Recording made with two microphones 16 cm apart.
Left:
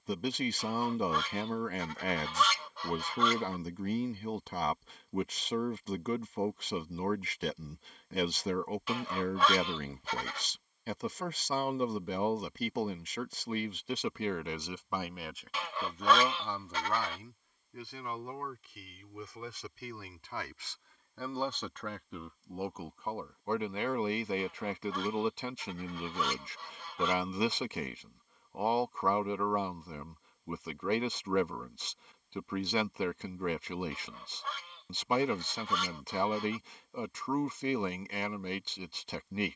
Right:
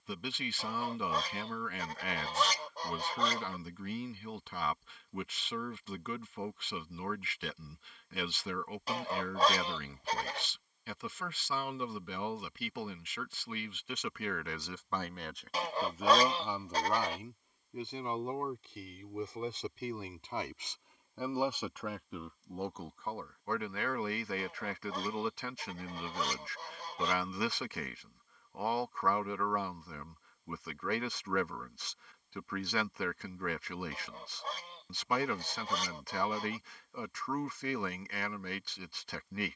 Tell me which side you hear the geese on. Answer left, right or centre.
right.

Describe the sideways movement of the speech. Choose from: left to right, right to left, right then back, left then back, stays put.
right then back.